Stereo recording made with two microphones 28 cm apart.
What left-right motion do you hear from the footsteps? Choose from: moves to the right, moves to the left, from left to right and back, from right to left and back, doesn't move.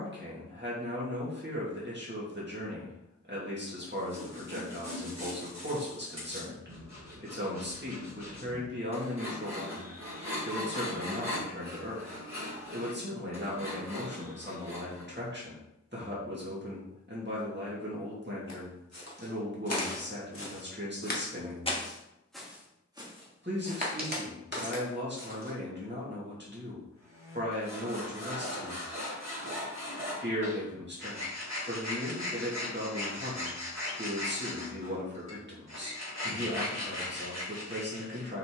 moves to the right.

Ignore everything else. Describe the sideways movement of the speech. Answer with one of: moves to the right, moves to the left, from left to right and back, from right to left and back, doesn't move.
doesn't move.